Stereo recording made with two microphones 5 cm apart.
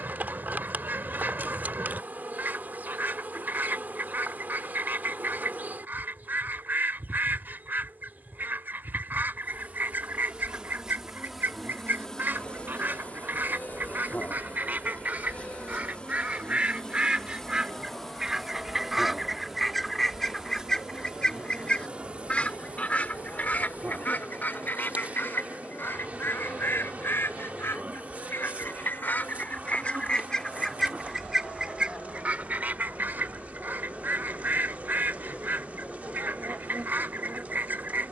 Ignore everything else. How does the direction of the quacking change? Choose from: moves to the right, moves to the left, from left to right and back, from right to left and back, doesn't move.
from right to left and back.